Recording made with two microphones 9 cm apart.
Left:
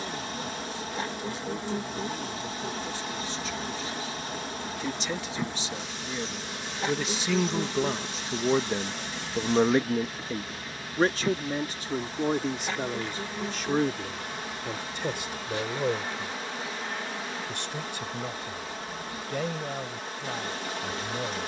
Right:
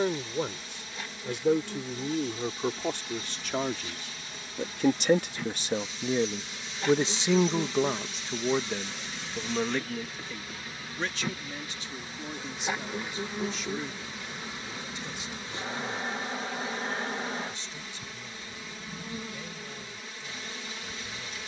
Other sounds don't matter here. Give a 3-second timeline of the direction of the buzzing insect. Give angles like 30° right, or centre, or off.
40° left, 30° left, 20° left, centre, 20° right, 30° right, 40° right.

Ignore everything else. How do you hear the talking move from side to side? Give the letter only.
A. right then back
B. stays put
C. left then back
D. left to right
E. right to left
E.